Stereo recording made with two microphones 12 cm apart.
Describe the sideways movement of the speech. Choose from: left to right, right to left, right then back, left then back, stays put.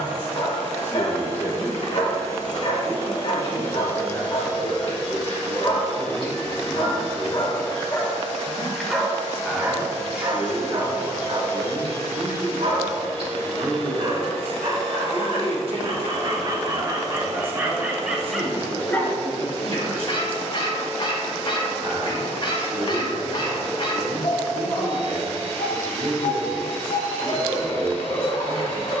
left to right.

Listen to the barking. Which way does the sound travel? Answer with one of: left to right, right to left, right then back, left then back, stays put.
right then back.